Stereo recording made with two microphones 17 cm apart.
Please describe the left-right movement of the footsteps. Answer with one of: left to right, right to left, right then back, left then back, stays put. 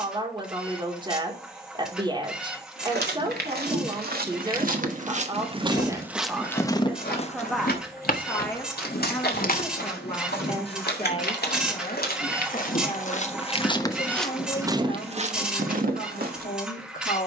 left then back.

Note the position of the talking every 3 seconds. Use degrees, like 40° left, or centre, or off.
30° right, 30° right, centre, 30° left, 50° left, 60° left.